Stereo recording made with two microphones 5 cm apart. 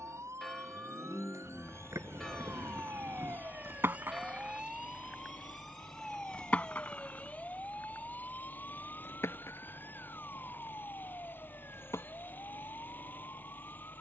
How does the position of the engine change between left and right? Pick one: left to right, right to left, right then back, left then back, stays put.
stays put.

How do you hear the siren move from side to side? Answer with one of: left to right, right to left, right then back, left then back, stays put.
right to left.